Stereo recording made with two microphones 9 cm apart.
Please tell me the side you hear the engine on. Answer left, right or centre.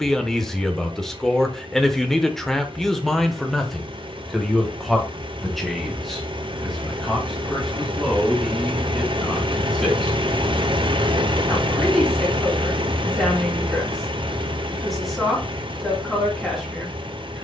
right.